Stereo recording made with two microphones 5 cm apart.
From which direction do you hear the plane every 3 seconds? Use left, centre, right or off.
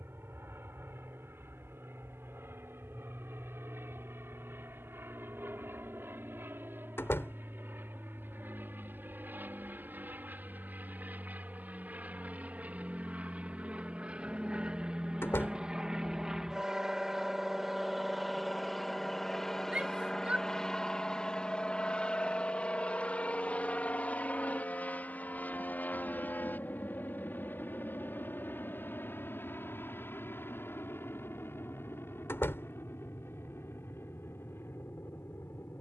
right, right, right, right, right, centre, centre, left, left, left, left, left.